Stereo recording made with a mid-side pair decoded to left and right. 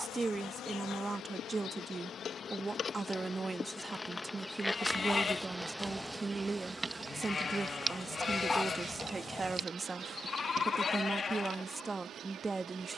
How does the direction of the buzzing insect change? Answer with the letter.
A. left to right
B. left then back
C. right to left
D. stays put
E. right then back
A.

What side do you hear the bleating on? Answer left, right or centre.
left.